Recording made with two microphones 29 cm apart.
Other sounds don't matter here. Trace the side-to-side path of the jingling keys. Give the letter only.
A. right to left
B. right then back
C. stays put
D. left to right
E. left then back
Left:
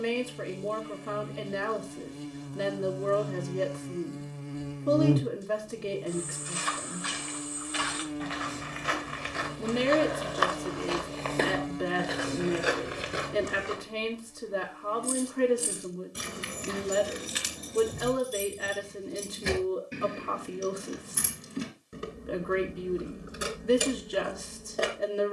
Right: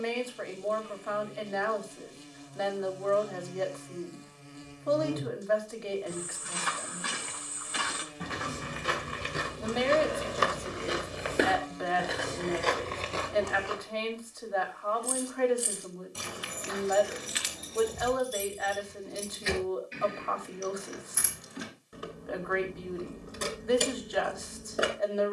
E.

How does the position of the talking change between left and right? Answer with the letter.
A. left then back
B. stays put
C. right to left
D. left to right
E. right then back
B.